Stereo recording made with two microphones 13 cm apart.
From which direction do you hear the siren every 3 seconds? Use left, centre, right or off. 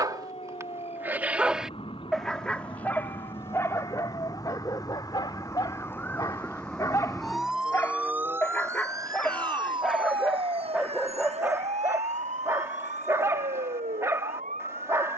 left, left, centre, right, right.